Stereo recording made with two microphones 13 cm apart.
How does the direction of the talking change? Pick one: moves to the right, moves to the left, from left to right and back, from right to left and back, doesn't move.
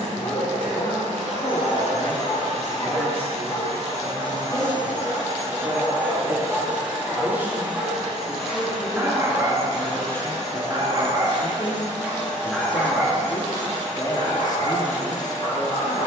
from left to right and back.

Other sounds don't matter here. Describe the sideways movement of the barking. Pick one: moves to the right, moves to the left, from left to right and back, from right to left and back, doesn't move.
from left to right and back.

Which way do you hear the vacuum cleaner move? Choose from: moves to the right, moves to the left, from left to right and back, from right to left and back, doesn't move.
moves to the left.